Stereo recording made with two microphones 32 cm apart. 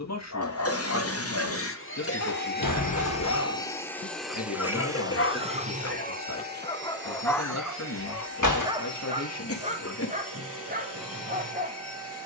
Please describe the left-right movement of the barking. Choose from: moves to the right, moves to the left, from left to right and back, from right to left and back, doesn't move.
moves to the right.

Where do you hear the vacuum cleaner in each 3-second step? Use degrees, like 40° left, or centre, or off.
40° left, centre, 40° right, 50° right.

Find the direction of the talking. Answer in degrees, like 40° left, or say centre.
50° left.